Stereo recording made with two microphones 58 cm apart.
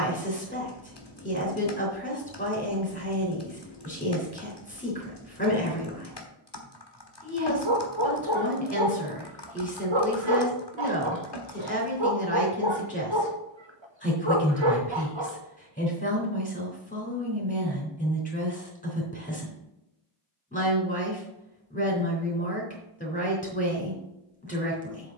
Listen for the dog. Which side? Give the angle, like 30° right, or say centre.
50° right.